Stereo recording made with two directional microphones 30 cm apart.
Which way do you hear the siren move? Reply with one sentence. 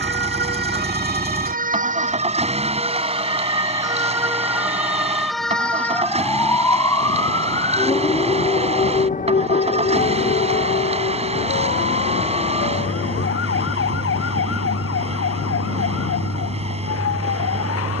You can hear the siren go from the right side to the left.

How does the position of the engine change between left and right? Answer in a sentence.
In this clip you hear the engine stay put.